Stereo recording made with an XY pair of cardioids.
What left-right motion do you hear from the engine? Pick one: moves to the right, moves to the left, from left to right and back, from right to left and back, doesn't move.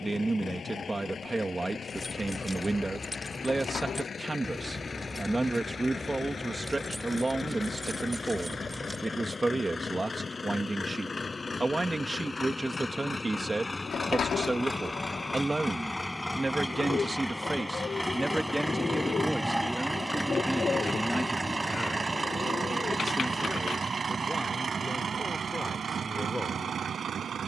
moves to the right.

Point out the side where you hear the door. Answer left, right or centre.
left.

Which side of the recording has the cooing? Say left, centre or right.
left.